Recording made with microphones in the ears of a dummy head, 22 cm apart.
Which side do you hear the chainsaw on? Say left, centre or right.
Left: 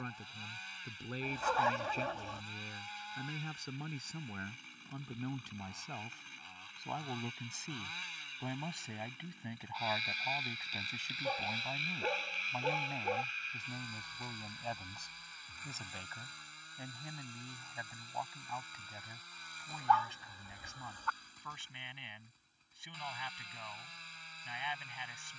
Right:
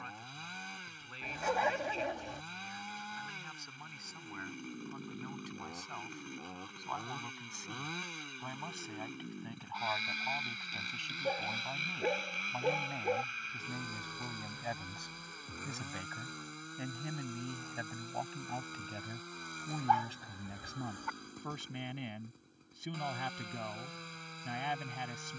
right.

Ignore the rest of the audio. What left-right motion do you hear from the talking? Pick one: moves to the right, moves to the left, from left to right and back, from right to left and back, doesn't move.
moves to the right.